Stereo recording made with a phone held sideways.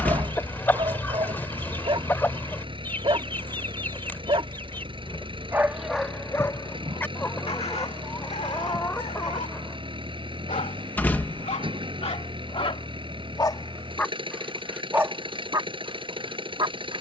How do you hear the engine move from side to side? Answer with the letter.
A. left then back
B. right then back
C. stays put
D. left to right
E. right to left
C.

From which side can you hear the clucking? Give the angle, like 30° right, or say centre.
20° left.